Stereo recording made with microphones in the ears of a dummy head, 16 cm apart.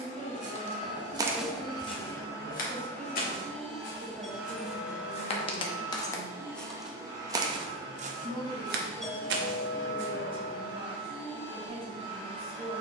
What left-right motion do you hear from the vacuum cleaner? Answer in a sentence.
You can hear the vacuum cleaner go from the left side to the right.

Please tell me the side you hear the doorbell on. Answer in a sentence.
In this clip you hear the doorbell in the centre.